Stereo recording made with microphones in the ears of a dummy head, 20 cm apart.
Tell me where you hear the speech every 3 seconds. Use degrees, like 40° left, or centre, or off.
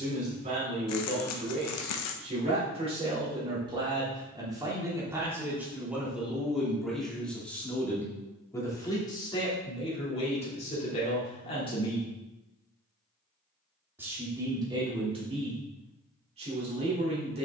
30° right, 20° right, 10° left, 30° left, 20° right, 30° right.